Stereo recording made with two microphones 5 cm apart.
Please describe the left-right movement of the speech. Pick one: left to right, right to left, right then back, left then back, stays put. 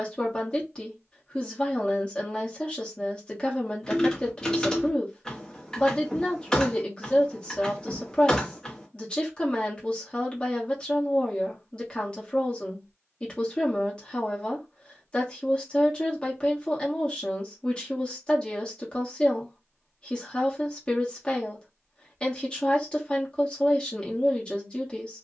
stays put.